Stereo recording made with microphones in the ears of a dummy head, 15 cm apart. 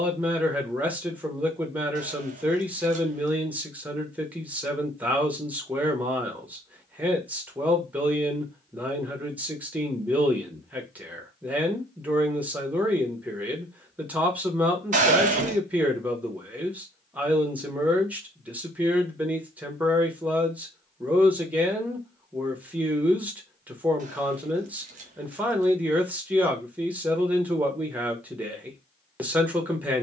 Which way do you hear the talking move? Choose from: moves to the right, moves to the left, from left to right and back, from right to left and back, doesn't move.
doesn't move.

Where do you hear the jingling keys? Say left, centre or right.
right.